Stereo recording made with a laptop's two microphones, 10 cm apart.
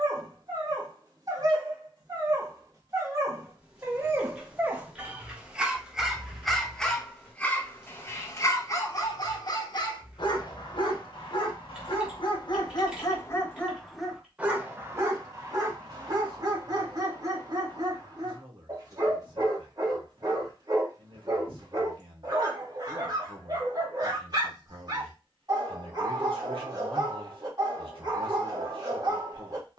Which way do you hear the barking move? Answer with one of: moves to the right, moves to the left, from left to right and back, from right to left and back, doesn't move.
from right to left and back.